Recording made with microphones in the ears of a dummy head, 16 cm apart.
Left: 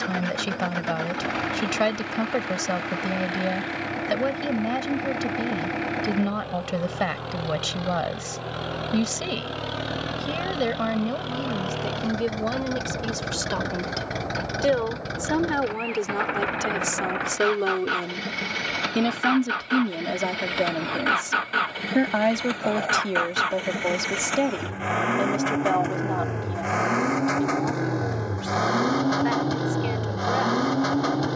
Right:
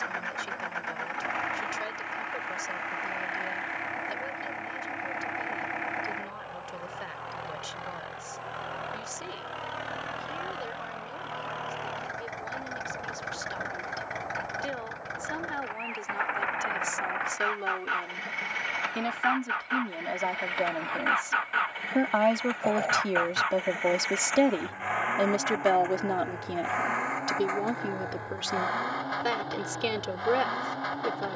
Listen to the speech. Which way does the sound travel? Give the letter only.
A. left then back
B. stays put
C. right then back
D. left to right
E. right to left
D.